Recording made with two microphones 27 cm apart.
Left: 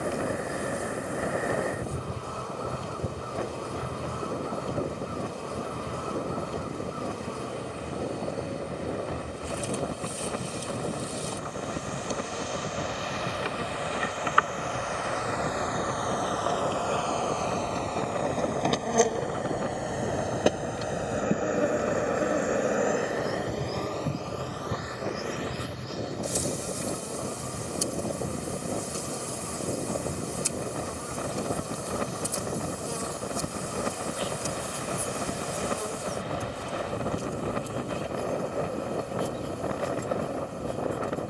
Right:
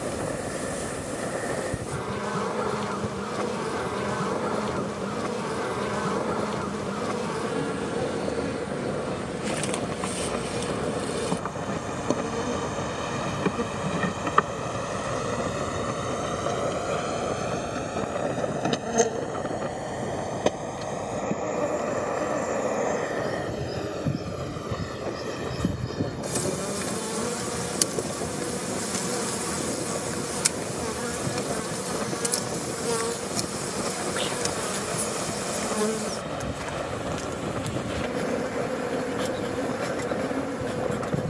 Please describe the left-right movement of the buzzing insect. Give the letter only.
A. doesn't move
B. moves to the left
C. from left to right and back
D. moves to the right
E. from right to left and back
E.